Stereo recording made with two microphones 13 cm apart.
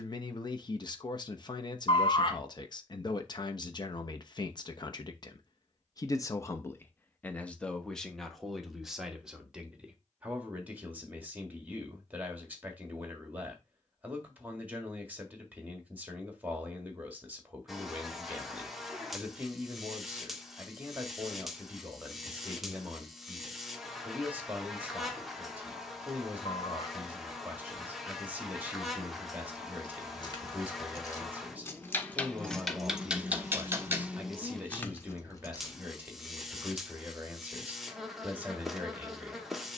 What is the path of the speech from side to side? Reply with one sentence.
In this clip you hear the speech move from left to right.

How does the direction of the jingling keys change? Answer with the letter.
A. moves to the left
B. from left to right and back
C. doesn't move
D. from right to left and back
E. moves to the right
B.